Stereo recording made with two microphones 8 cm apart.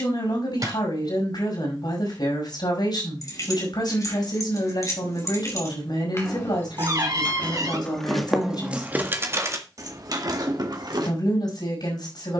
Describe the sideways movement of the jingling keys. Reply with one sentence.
In this clip you hear the jingling keys travel towards the right.